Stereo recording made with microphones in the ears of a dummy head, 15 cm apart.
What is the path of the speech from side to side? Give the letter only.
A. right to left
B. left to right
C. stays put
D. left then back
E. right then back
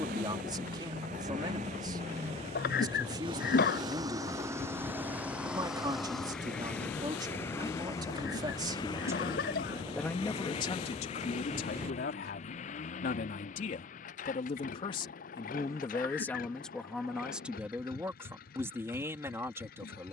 D.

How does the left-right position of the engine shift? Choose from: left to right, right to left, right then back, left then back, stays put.
right to left.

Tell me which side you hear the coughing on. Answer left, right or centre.
left.